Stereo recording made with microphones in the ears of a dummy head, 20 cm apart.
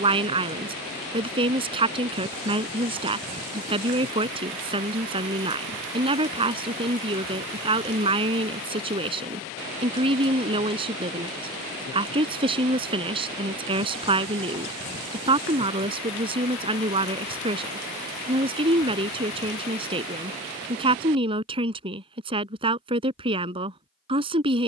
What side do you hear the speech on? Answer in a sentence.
You can hear the speech on the right.